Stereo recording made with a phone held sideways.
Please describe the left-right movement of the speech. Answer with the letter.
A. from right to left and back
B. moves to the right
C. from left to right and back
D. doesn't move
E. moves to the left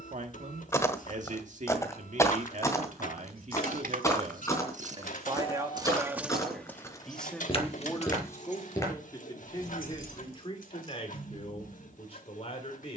E.